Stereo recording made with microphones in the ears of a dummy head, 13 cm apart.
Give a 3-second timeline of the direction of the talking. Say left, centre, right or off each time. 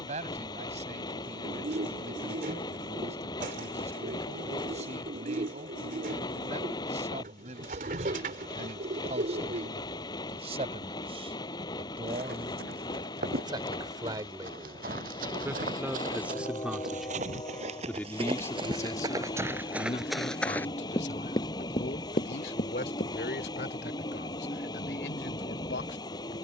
right, right, right, right, right, centre, left, left, left.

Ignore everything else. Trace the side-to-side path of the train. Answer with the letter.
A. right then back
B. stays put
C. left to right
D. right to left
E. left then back
B.